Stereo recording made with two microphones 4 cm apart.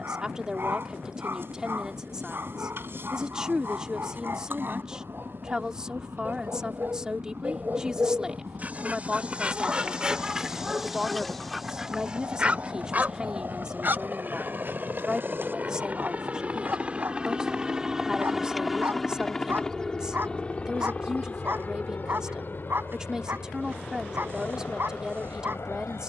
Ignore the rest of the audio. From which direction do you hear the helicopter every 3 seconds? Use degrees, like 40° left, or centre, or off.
80° right, 80° right, 70° right, 70° right, 60° right, 30° right, 10° left, 40° left, 60° left.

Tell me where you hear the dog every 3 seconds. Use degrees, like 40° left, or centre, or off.
60° right, 60° right, 40° right, 10° right, 40° right, 60° right, 60° right, 60° right, 60° right.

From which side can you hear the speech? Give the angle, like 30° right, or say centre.
20° right.